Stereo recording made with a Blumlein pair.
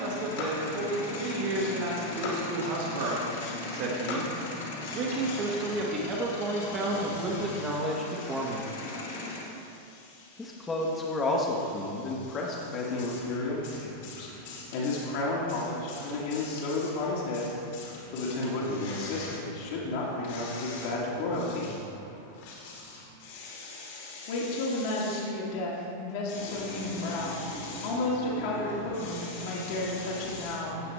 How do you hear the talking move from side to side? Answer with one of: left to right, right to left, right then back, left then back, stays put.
right to left.